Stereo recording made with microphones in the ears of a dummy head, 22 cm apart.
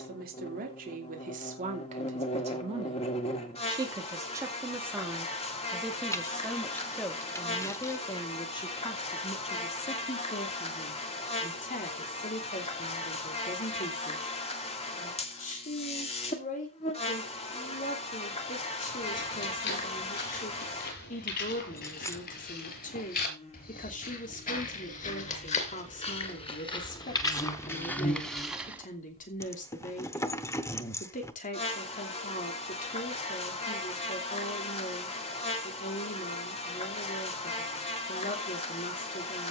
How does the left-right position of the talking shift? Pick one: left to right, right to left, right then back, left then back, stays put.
right to left.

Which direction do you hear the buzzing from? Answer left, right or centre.
left.